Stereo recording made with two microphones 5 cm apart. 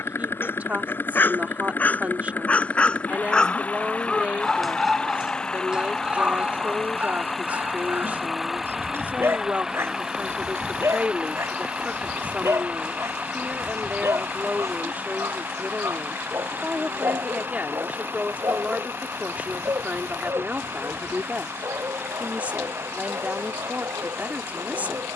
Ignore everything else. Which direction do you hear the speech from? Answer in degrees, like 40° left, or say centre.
30° right.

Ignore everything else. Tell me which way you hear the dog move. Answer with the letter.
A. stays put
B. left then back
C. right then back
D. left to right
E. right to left
D.